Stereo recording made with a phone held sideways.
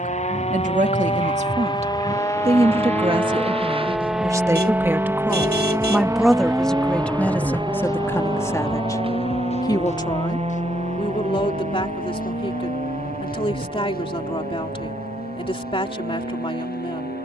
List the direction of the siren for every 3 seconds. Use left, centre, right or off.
left, centre, right, right, right, right.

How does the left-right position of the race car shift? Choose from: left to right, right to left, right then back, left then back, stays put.
right to left.